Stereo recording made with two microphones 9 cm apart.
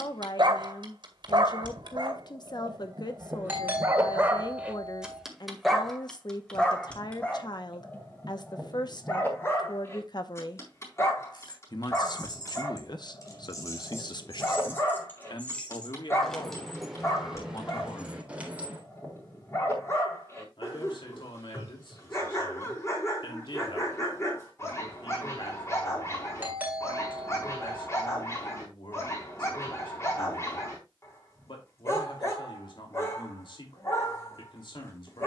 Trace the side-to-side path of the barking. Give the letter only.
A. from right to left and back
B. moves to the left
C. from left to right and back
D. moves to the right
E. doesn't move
B.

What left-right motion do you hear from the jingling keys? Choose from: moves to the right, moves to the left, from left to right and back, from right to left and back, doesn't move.
moves to the right.